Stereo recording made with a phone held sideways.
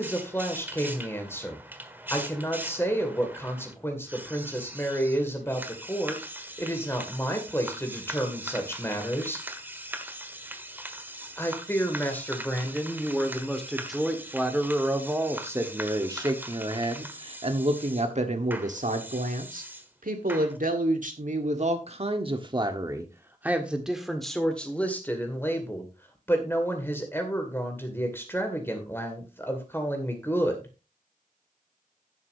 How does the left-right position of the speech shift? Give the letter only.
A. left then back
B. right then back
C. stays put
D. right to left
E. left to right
B.